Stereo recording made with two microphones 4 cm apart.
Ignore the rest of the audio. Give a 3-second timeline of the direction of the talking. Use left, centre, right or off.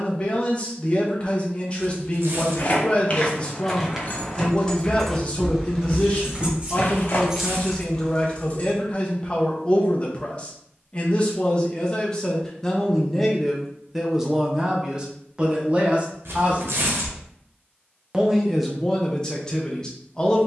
left, left, left, left, centre, right, centre.